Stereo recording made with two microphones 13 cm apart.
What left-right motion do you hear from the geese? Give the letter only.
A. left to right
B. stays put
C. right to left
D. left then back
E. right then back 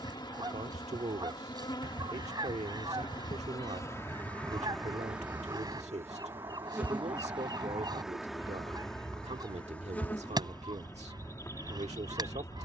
B.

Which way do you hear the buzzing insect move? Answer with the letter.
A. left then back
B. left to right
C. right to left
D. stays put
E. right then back
E.